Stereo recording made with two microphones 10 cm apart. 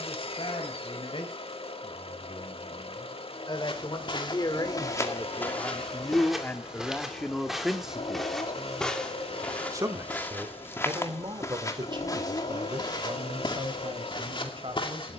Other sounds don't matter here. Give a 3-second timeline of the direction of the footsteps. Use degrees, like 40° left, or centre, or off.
off, 40° left, centre, 20° left, 50° left.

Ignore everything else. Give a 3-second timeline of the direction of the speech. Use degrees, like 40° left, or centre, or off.
60° left, 40° left, 10° left, 50° right, 60° right.